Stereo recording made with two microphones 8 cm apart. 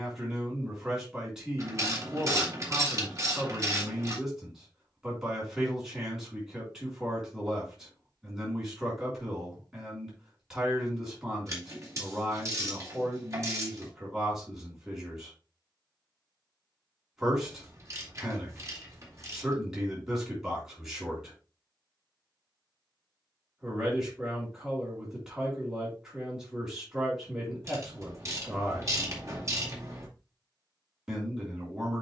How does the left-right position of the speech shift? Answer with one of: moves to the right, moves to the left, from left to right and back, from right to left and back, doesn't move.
doesn't move.